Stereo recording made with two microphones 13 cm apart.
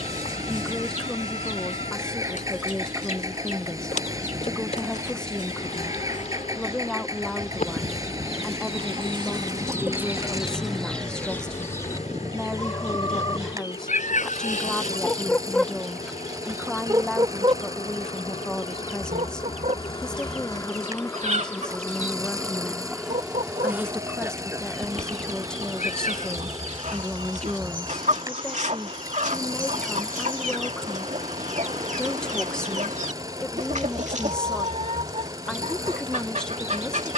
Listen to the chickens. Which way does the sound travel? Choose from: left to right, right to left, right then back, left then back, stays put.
left then back.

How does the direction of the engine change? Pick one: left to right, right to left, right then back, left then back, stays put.
stays put.